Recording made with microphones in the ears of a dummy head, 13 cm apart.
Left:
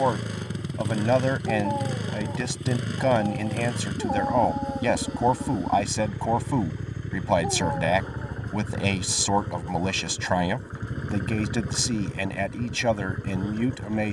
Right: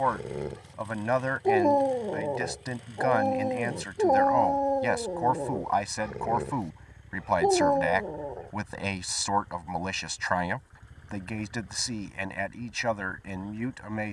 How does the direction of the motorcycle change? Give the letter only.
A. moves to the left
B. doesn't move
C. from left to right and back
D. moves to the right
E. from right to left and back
B.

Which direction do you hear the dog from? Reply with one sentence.
You can hear the dog on the right.